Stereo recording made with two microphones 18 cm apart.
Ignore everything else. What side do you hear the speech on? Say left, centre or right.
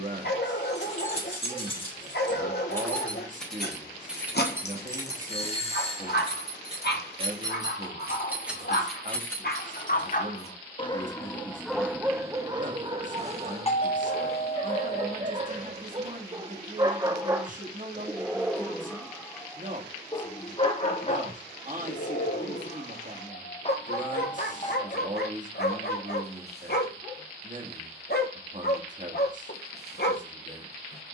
right.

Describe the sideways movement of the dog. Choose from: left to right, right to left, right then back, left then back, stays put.
right then back.